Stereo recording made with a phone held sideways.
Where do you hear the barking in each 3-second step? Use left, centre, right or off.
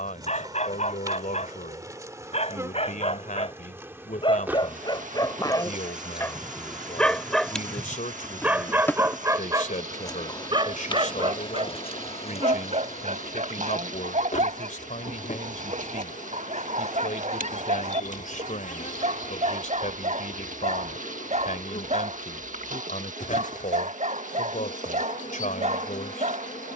left, left, centre, right, right, right, right, right, right.